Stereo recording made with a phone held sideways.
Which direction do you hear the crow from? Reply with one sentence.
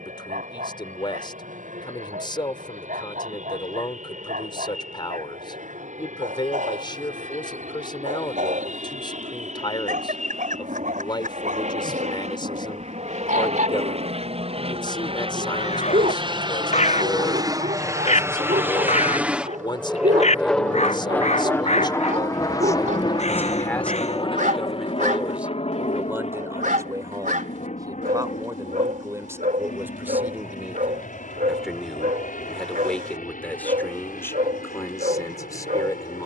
You can hear the crow on the left.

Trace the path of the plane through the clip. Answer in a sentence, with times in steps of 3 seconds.
You can hear the plane on the right from 0 s, in the centre from 18 s and on the left from 21 s.